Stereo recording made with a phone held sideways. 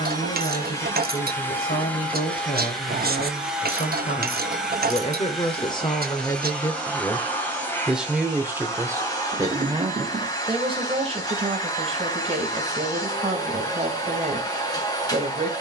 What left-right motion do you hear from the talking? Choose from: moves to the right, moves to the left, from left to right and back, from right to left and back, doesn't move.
moves to the right.